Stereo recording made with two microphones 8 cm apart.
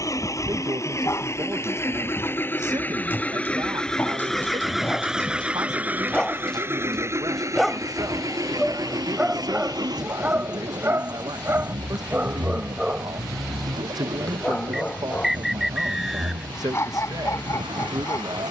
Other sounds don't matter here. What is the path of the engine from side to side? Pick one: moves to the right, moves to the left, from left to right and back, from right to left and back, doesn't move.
moves to the right.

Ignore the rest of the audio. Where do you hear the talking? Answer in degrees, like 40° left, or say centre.
60° right.